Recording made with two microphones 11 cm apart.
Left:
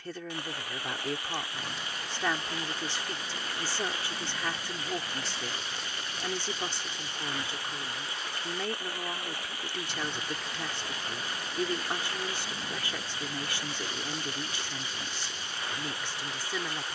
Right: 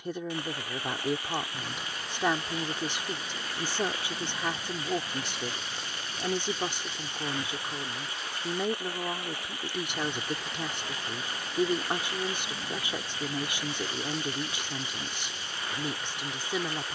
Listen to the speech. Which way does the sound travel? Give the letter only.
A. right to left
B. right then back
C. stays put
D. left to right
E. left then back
C.